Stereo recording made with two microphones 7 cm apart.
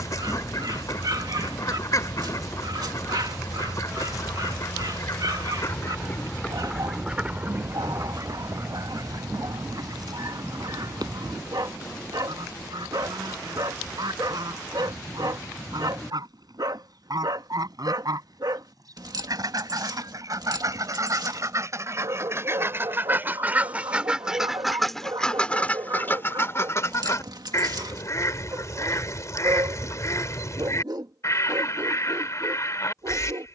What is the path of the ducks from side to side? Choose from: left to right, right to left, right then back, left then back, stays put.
right then back.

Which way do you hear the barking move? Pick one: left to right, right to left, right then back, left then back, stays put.
stays put.